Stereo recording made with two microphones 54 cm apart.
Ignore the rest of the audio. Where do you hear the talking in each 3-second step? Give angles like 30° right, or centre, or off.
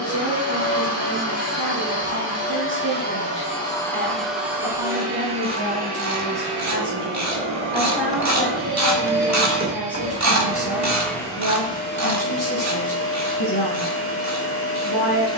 20° right, 20° right, 10° right, 10° left, 30° left.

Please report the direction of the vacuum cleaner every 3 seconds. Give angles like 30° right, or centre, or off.
30° left, centre, 20° right, centre, 20° left.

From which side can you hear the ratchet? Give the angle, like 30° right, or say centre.
30° right.